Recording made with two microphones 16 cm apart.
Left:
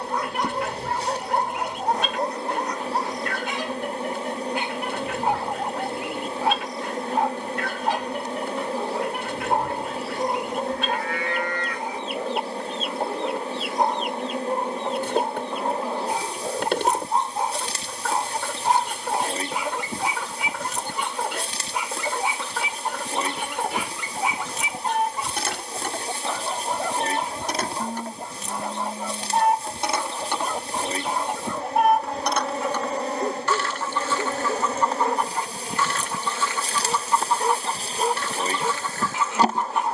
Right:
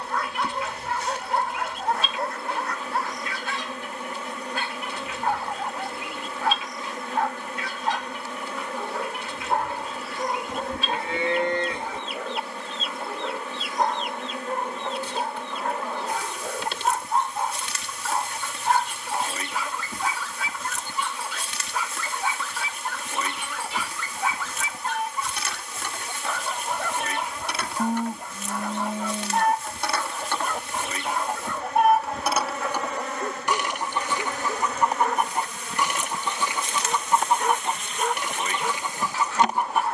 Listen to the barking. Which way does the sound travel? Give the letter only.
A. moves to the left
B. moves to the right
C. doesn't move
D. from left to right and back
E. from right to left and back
C.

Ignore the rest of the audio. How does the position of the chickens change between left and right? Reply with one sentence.
In this clip you hear the chickens move from left to right.